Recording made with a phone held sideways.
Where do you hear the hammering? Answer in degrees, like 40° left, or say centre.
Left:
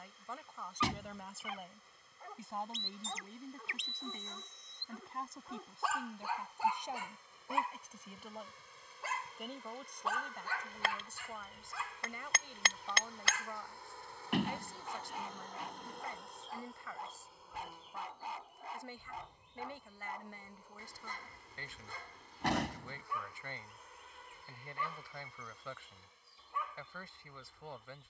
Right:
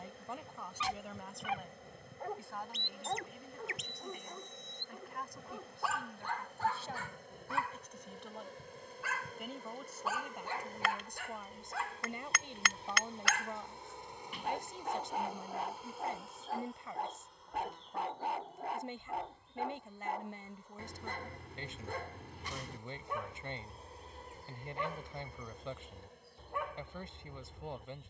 30° left.